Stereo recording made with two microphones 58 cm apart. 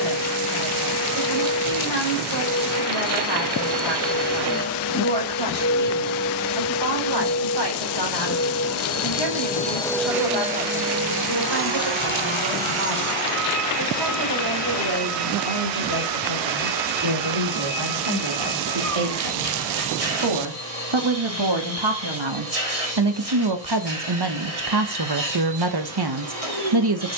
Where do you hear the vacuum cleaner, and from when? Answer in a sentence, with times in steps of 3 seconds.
You can hear the vacuum cleaner on the left from 0 s, in the centre from 9 s and on the right from 12 s.